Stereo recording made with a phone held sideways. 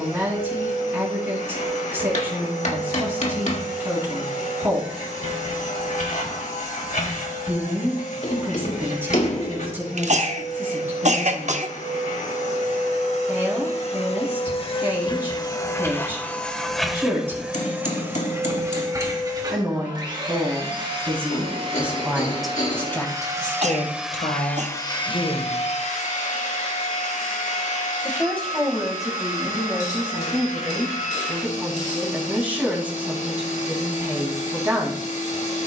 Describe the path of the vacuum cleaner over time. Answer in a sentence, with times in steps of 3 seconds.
In this clip you hear the vacuum cleaner on the left from 0 s, in the centre from 15 s, on the right from 18 s and on the left from 24 s.